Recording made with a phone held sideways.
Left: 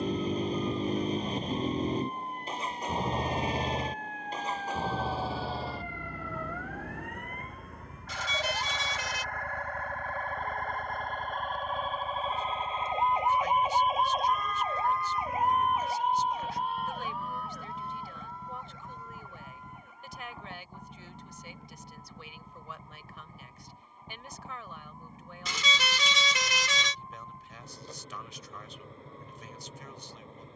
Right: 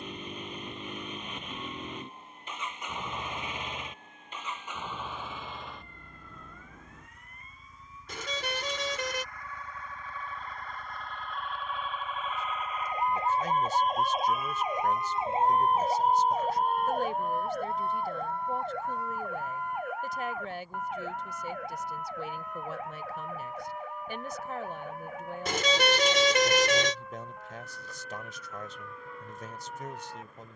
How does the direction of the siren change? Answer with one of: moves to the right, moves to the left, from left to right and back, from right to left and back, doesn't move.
moves to the right.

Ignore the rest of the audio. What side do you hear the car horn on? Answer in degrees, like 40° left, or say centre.
60° right.